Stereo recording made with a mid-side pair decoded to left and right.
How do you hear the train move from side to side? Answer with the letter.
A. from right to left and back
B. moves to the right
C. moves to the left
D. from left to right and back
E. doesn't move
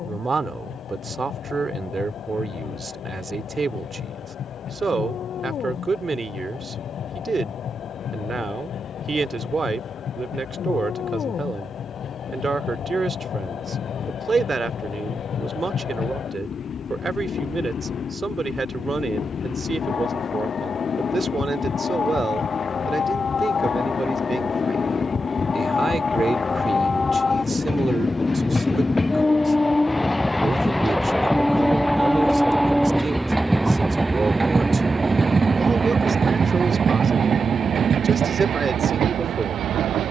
B.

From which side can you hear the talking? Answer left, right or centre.
right.